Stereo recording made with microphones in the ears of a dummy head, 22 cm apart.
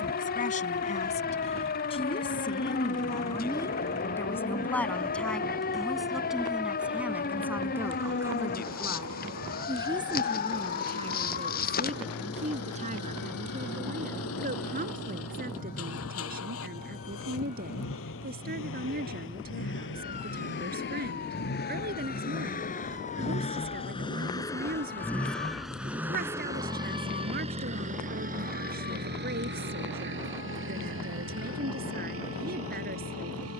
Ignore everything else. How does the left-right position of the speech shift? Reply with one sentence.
In this clip you hear the speech go from the left side to the right.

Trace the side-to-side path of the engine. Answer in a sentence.
You can hear the engine travel towards the right.